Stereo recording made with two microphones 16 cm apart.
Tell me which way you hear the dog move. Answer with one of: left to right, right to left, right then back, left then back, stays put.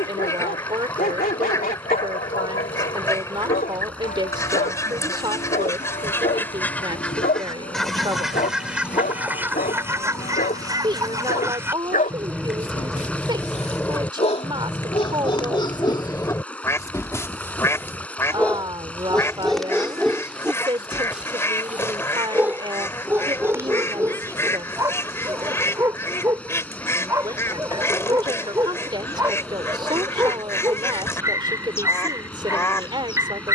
left to right.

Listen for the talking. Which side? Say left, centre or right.
right.